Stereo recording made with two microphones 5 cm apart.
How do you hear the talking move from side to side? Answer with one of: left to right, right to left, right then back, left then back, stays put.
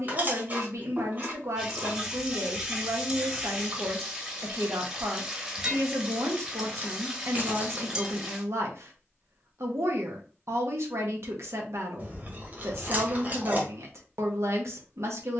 stays put.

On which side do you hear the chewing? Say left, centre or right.
right.